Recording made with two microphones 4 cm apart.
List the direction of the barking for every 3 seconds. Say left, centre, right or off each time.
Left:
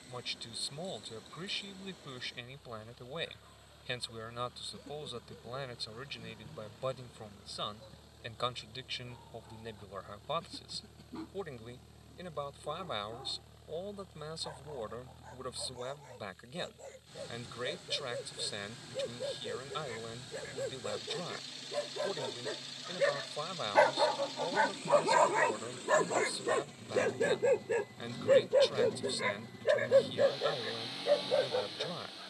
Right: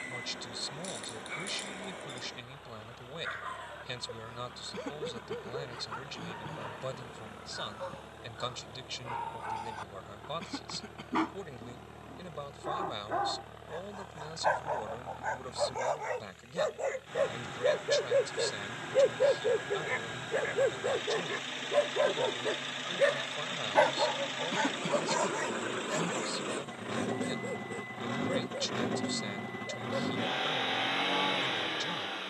right, right, right, right, right, right, right, right, left, left, left.